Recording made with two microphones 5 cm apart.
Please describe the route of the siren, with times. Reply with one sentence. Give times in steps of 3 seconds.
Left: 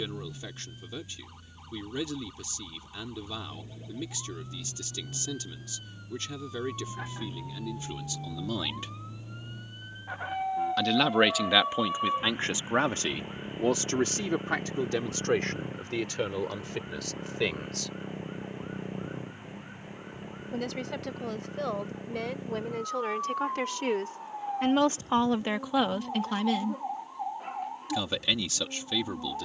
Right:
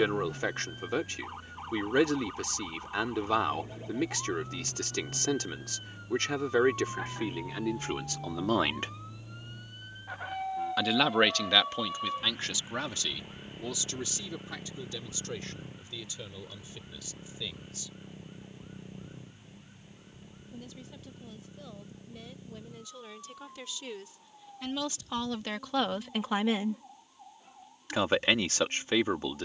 In this clip you hear the siren on the right from 0 s, in the centre from 6 s and on the left from 12 s.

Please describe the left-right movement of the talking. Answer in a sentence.
In this clip you hear the talking go left and come back.